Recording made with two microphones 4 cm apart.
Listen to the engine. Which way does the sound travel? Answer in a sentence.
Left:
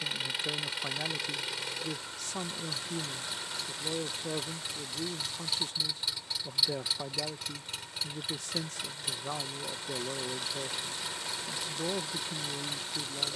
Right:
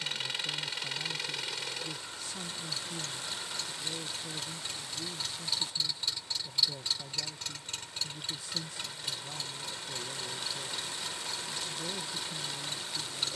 You can hear the engine stay put.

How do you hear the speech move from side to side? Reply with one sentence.
In this clip you hear the speech stay put.